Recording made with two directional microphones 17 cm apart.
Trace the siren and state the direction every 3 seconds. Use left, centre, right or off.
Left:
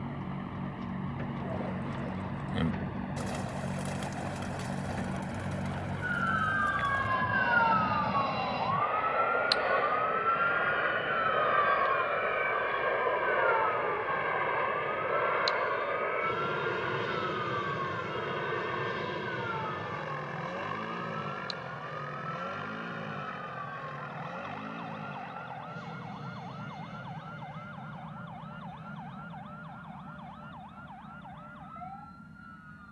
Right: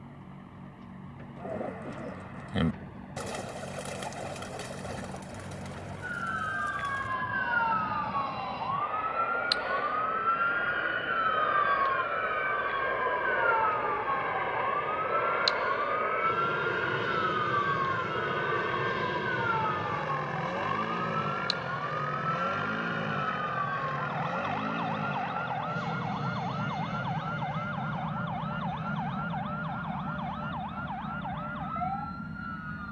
left, left, centre, centre, right, right, right, right, right, right, right.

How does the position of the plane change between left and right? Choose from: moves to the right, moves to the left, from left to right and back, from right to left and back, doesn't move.
moves to the right.